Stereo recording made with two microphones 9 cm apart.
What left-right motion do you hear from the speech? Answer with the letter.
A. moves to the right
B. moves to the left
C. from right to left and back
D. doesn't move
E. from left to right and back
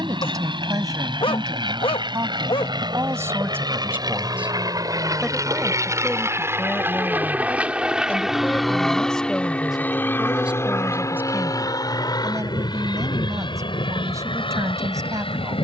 C.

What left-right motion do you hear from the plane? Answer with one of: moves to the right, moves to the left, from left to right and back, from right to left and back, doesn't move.
moves to the left.